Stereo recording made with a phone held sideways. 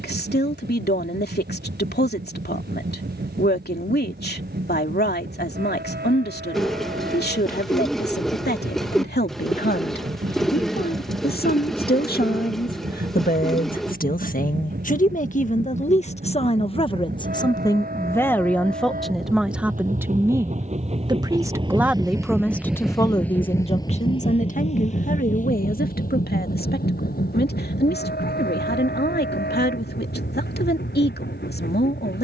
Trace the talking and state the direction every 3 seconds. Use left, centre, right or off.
left, left, left, left, left, left, centre, centre, left, left, left.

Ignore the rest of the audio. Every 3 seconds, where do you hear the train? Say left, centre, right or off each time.
right, right, right, right, right, right, right, centre, left, left, left.